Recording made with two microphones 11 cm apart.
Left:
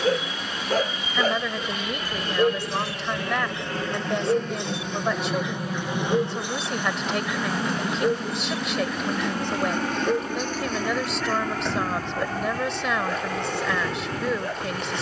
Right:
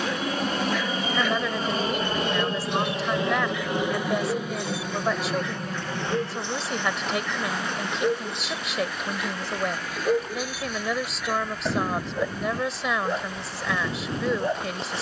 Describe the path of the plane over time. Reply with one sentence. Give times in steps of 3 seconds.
You can hear the plane on the right from 0 s, in the centre from 3 s and on the left from 6 s.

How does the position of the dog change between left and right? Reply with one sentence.
In this clip you hear the dog move from left to right.